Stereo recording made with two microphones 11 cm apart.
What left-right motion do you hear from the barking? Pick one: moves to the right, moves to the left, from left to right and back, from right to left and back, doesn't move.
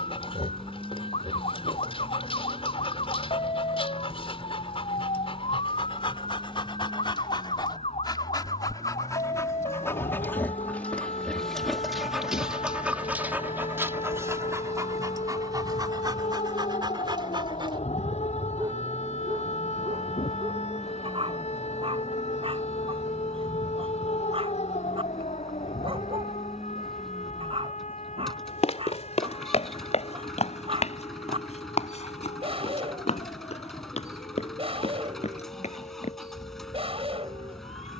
moves to the right.